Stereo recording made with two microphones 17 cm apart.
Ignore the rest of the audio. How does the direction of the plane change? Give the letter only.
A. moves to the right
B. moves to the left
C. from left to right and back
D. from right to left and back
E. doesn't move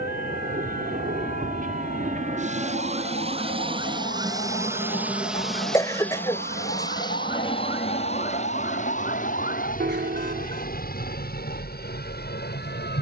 B.